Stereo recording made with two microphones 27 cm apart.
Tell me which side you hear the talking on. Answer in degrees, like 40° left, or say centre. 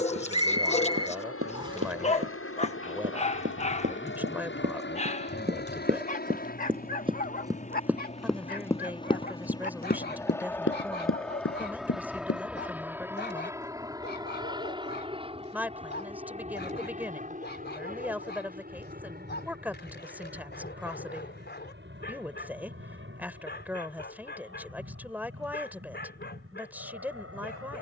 10° right.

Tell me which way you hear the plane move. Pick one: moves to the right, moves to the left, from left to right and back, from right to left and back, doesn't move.
moves to the right.